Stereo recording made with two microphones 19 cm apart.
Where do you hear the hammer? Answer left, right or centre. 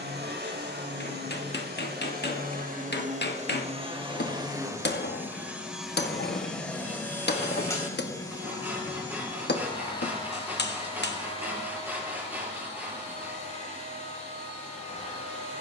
left.